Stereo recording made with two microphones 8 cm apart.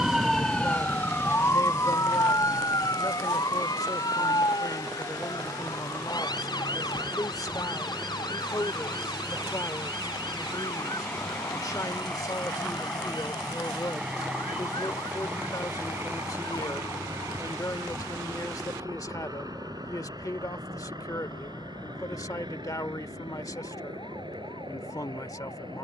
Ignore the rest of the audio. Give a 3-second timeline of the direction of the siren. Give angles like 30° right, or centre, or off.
30° left, 60° left, 70° left, 70° left, 70° left, 70° left, 70° left, 70° left, 70° left.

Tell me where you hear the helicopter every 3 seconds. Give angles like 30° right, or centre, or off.
60° left, 50° left, 40° left, 20° left, centre, 30° right, 50° right, 60° right, 70° right.